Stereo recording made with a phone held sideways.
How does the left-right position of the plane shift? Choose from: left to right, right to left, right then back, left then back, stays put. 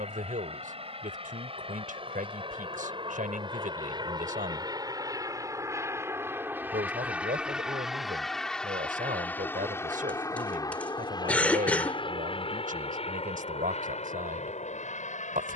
right to left.